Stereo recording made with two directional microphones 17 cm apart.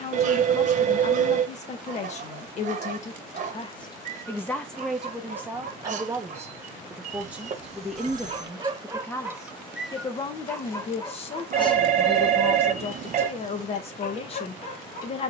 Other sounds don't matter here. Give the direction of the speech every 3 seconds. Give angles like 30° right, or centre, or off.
40° left, 10° left, centre, 30° left, 40° left.